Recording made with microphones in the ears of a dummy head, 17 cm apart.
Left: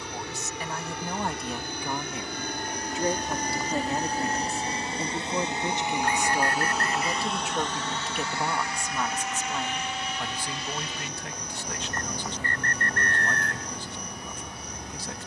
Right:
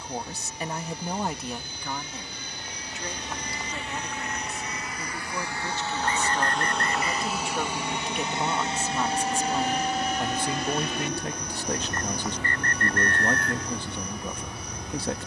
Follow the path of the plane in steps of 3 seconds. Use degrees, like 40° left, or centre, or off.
50° left, 30° left, 10° right, 40° right, 60° right.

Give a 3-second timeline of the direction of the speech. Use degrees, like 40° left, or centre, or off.
10° right, 20° left, centre, 20° right, 50° right.